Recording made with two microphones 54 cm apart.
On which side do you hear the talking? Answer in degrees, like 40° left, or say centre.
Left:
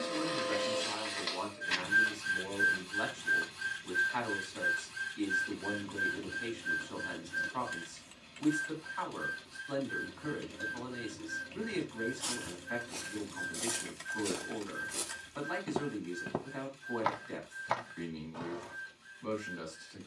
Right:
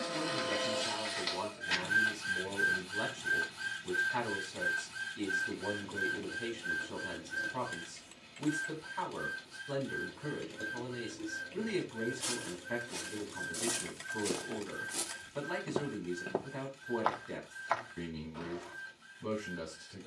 50° right.